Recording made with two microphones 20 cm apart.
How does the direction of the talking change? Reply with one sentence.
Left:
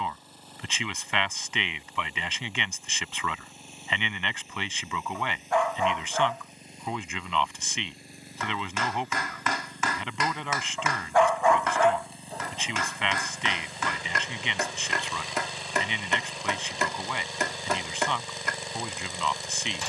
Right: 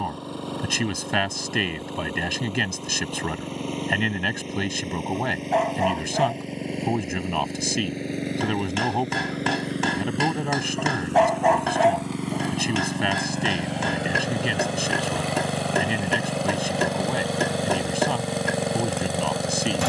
You can hear the talking stay in one place.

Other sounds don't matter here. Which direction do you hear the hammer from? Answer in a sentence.
In this clip you hear the hammer on the right.